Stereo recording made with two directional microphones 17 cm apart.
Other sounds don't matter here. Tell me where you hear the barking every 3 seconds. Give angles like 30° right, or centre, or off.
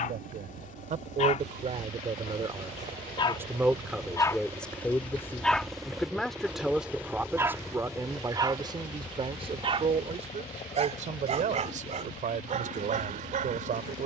40° left, 10° left, 20° right, 40° right, 50° right.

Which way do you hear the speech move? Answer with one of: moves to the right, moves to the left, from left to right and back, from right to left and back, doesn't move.
from right to left and back.